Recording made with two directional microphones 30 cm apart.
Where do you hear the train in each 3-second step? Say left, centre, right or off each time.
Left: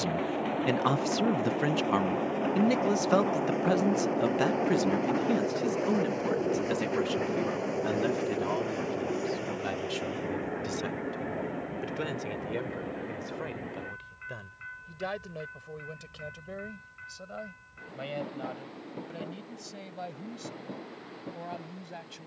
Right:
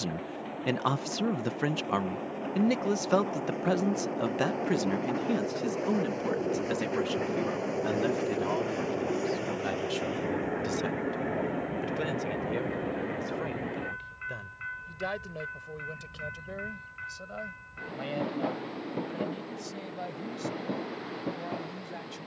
left, left, centre, right, right, right, right, right.